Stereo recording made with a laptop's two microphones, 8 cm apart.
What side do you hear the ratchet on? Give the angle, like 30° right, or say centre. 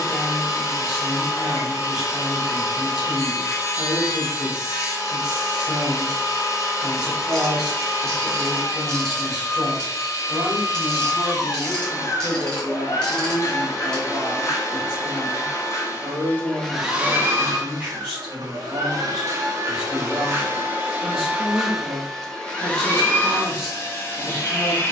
10° left.